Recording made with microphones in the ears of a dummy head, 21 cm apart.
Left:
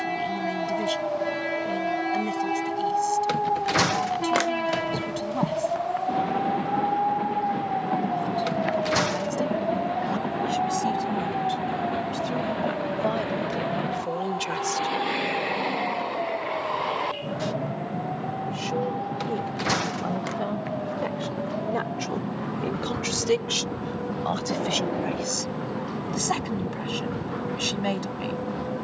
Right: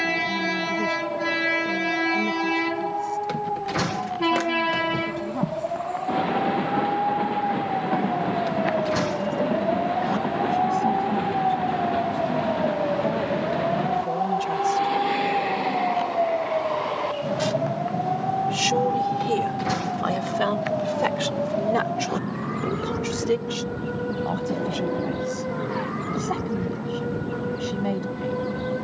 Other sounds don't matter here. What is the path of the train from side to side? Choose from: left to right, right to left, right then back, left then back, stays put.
right to left.